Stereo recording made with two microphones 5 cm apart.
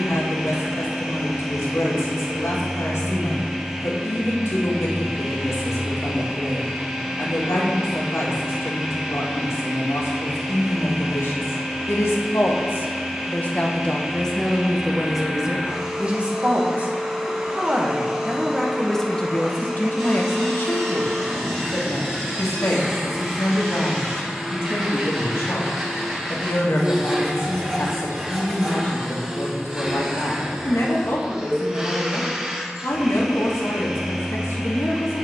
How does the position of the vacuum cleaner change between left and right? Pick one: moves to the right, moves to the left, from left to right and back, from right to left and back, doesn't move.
doesn't move.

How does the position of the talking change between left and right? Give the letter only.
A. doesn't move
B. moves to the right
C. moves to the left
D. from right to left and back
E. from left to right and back
E.